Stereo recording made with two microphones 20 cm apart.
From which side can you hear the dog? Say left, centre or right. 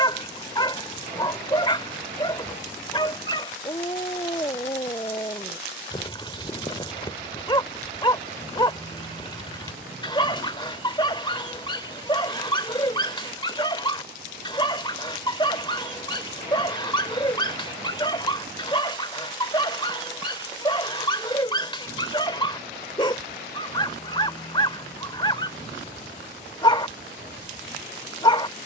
left.